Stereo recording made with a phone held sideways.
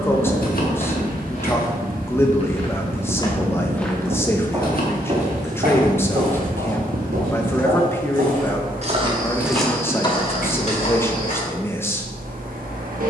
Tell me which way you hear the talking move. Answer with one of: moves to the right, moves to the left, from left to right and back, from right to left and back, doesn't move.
doesn't move.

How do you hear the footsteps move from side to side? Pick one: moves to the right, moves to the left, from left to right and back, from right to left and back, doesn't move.
from left to right and back.